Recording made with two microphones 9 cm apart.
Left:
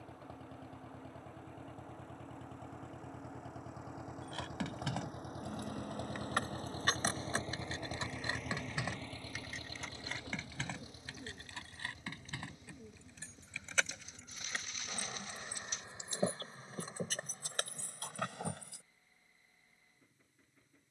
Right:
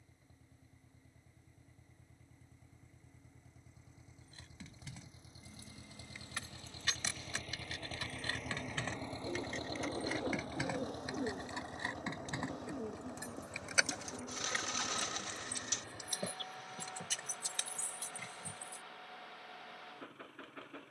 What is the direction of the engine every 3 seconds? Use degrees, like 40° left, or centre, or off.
80° left, 70° left, 20° left, 40° right, 60° right, 70° right, 70° right.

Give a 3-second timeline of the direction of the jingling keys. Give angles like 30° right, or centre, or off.
off, 70° left, 30° left, 10° right, 10° right, 30° left, 70° left.